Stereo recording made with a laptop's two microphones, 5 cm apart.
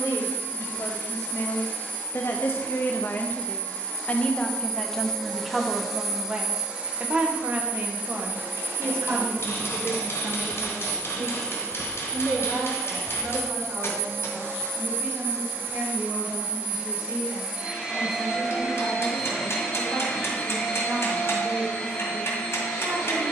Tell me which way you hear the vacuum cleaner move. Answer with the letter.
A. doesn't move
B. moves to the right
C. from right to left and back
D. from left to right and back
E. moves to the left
D.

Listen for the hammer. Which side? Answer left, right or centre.
left.